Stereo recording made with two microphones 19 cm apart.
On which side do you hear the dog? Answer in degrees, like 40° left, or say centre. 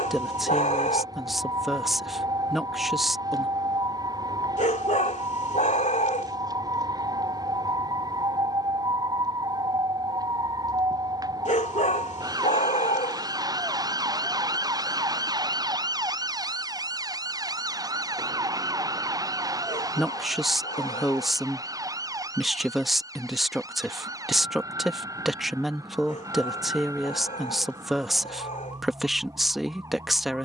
40° left.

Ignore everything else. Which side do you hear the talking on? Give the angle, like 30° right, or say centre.
centre.